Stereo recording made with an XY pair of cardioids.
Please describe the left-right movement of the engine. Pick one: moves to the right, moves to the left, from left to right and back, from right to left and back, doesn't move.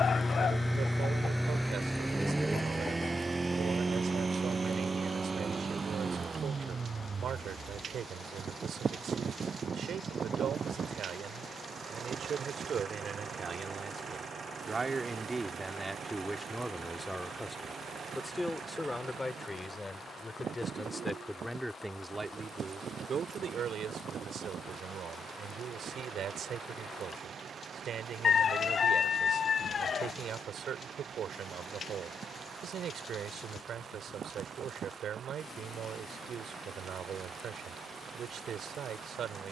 moves to the right.